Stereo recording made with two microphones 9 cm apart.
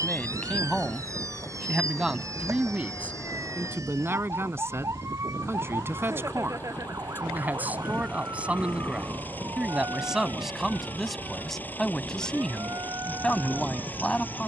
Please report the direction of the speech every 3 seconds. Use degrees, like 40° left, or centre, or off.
centre, 20° right, 20° right, centre, 10° left.